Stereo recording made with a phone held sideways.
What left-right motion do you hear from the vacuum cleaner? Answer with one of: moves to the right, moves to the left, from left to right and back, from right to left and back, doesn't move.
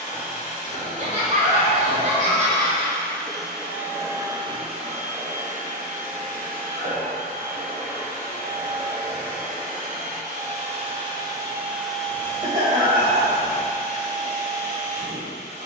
from left to right and back.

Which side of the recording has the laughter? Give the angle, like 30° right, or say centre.
50° right.